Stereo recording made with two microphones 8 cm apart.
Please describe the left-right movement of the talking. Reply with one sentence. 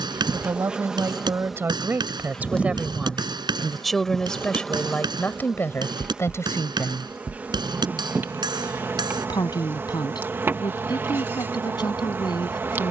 You can hear the talking move to the left.